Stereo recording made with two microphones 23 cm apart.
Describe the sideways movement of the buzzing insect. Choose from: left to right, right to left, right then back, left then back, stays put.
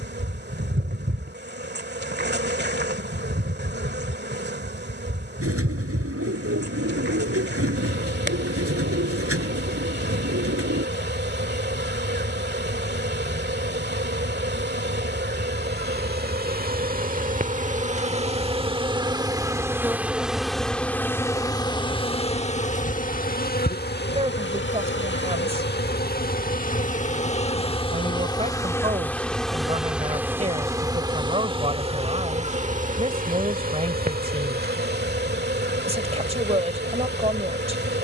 left then back.